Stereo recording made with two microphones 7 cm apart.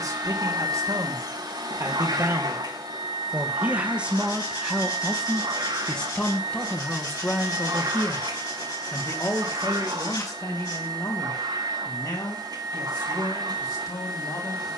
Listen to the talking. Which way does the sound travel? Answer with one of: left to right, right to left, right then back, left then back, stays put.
right to left.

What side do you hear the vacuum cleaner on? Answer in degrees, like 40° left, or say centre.
70° right.